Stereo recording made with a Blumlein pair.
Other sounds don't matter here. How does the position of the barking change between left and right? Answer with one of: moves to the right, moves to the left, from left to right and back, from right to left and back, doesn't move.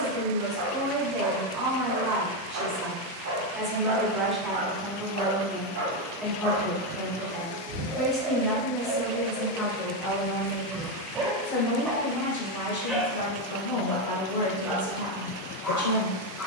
moves to the left.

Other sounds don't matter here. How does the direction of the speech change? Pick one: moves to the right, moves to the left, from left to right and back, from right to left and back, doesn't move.
moves to the left.